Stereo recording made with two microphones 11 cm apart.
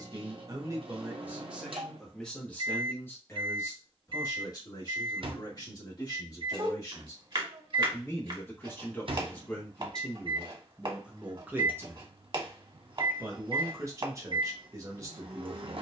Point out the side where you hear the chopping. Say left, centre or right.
right.